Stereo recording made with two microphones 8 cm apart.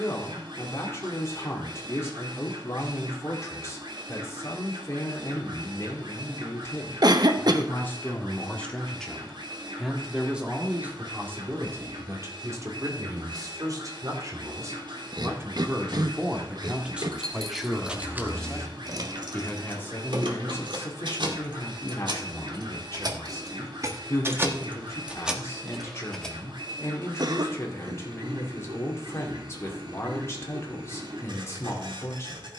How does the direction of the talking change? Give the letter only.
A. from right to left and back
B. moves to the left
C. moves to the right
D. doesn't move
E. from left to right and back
E.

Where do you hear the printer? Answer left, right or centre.
right.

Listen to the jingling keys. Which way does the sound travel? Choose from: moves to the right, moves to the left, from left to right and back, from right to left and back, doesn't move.
from left to right and back.